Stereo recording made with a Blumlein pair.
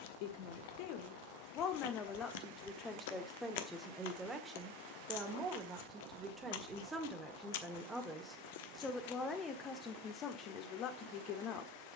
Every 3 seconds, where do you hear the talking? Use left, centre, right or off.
left, centre, centre, left.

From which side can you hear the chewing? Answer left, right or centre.
left.